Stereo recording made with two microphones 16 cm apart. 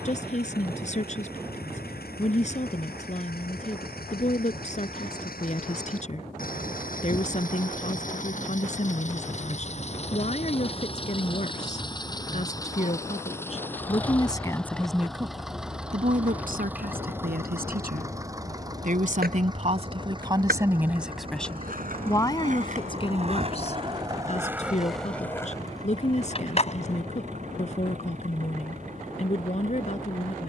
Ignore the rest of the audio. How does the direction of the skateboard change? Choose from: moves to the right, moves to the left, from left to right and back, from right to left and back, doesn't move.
moves to the left.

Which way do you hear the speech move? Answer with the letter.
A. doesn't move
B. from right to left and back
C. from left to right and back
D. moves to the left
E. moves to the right
C.